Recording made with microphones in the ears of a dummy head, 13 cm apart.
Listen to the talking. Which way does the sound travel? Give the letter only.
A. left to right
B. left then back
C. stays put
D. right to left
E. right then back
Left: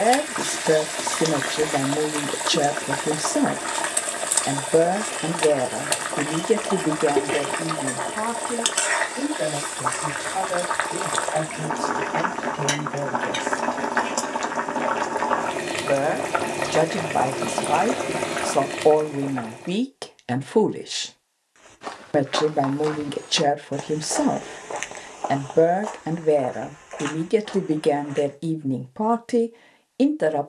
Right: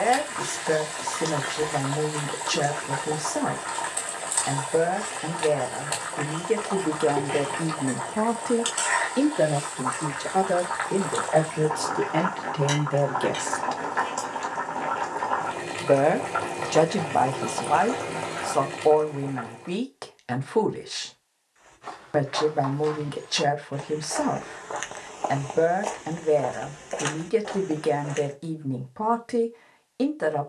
E.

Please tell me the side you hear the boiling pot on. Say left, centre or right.
left.